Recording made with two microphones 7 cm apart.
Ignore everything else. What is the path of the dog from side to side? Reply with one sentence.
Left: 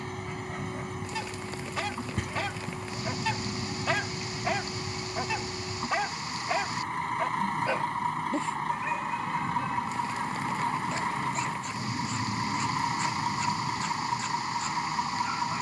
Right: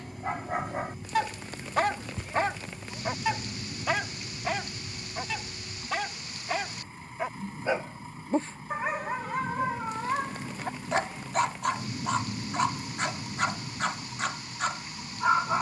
You can hear the dog go left and come back.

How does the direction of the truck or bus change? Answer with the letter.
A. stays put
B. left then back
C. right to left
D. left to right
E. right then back
A.